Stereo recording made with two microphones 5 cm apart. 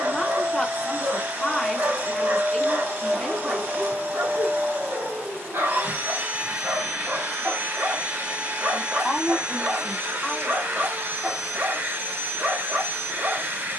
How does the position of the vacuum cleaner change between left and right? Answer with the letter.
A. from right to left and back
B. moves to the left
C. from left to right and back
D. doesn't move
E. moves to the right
D.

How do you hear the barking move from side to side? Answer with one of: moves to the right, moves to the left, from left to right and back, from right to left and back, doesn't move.
doesn't move.